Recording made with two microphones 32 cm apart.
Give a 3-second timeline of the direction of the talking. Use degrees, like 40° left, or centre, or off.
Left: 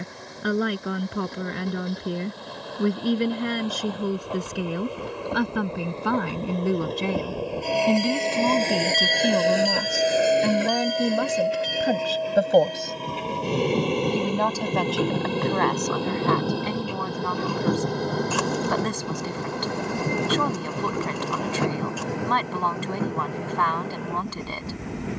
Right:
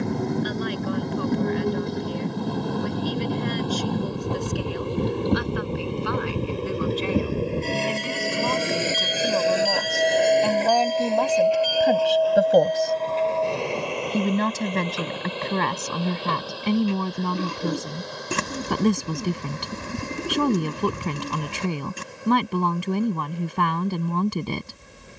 70° left, 70° left, 50° left, 20° left, 10° right, 40° right, 40° right, 40° right, 40° right.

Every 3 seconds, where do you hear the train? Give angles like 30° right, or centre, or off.
60° right, 50° right, 30° right, 10° left, 40° left, 60° left, 70° left, 70° left, 80° left.